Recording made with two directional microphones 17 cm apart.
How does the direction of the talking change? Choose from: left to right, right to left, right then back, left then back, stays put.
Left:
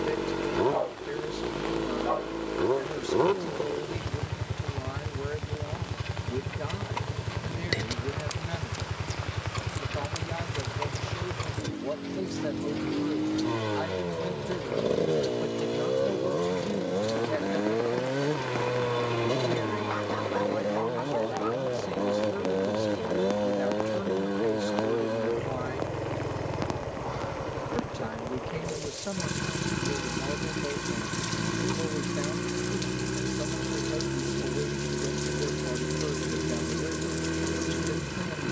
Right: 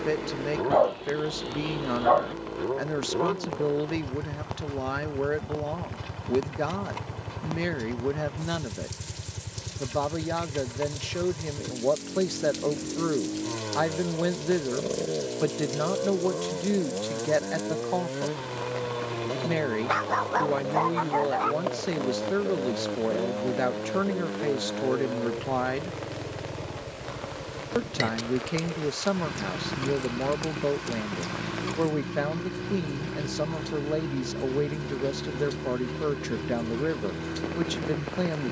stays put.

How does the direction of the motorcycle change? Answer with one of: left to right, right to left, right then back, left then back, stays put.
stays put.